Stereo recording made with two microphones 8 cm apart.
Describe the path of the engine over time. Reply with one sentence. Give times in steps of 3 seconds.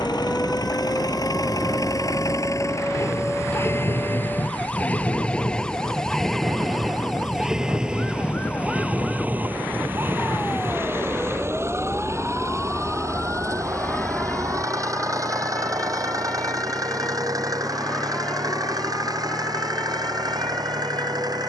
You can hear the engine on the left from 0 s, in the centre from 6 s and on the right from 9 s.